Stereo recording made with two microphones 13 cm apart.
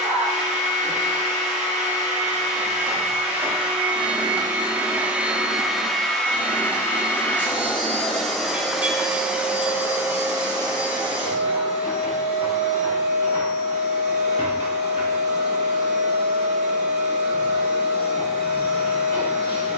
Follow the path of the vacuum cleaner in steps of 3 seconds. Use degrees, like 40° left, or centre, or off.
60° right, 30° right, 10° left, 30° right, 60° right, 60° right, 60° right.